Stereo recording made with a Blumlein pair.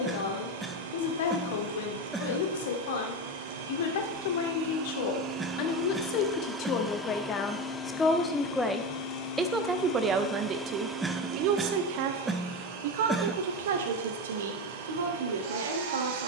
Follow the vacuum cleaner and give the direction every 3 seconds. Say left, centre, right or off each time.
right, right, centre, centre, right, right.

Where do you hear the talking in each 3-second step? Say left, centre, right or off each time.
left, left, left, right, right, right.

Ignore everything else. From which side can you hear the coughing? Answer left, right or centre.
centre.